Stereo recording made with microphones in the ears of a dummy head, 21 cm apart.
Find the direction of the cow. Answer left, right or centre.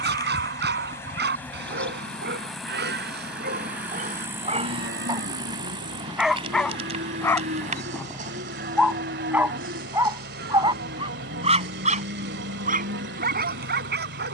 right.